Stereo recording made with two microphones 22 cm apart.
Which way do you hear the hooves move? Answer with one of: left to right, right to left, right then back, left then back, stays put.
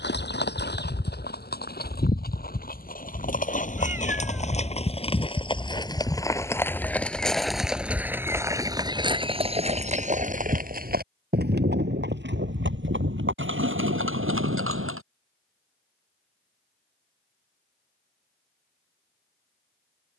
left to right.